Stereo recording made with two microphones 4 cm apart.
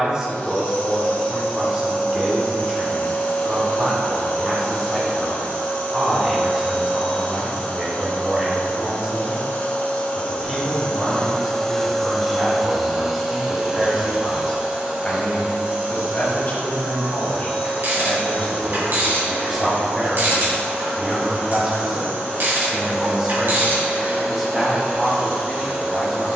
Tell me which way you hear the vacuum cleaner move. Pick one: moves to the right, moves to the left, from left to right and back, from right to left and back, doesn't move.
moves to the right.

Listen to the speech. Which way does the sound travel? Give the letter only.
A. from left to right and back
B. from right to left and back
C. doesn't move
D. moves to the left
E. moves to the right
B.